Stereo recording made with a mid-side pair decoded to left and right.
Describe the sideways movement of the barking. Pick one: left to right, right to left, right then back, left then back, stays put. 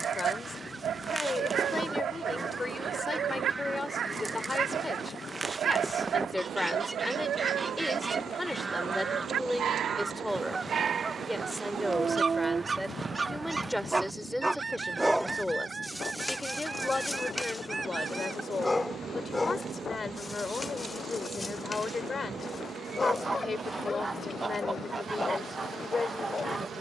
right to left.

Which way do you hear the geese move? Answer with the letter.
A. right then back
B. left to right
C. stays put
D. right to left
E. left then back
C.